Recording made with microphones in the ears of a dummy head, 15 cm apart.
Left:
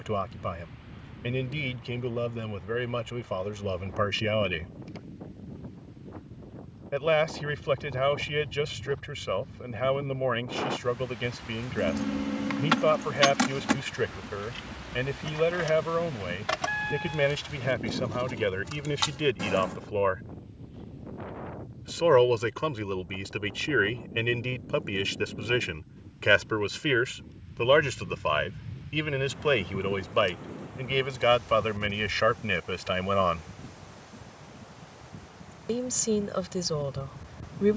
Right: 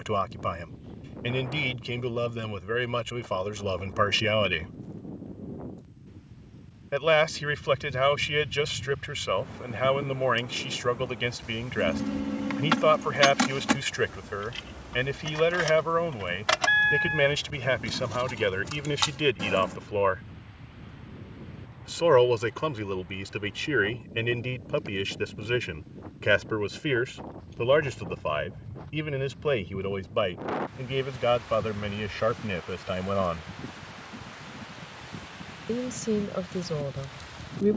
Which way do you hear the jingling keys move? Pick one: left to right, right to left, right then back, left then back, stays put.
right then back.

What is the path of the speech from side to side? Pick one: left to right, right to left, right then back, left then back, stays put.
right to left.